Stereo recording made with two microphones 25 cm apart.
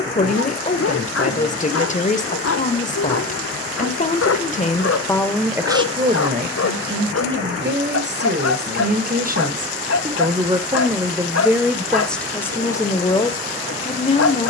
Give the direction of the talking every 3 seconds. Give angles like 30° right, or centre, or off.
30° left, 20° left, 40° right, 20° right, 20° left.